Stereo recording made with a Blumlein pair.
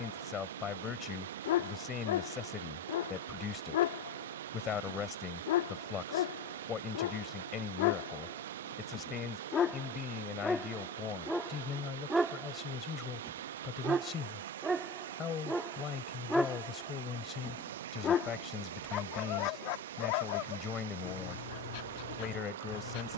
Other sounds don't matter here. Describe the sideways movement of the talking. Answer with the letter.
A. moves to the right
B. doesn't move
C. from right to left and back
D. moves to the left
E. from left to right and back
B.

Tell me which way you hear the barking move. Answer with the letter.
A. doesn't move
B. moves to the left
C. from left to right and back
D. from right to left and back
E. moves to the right
C.